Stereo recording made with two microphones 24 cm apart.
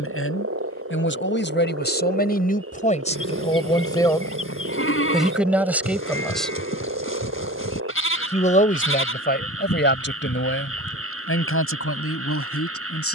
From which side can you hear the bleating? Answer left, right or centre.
left.